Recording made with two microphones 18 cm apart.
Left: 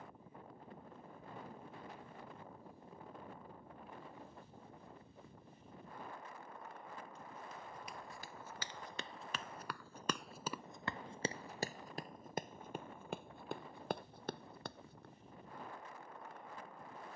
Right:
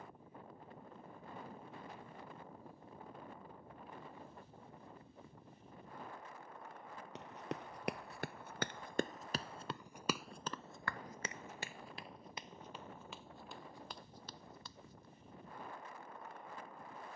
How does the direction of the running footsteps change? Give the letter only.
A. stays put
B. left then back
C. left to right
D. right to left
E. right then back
D.